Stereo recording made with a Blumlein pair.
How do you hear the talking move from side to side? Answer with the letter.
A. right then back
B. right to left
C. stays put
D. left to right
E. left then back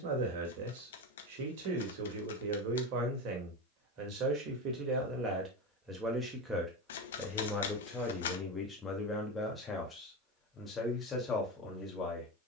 B.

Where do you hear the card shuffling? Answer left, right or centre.
left.